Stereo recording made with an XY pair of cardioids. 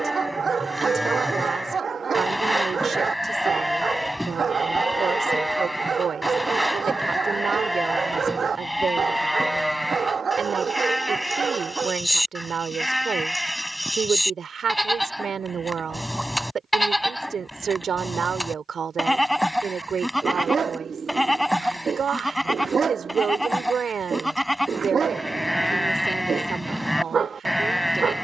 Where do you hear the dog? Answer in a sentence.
You can hear the dog on the right.